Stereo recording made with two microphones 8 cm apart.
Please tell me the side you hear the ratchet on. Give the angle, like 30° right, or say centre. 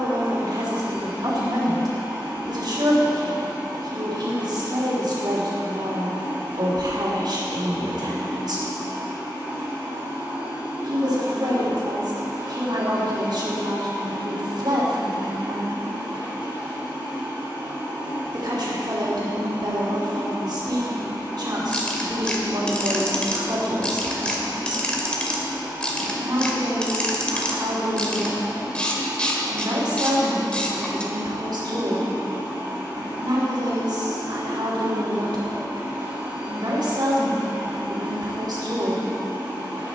10° left.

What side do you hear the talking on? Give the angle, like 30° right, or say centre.
70° right.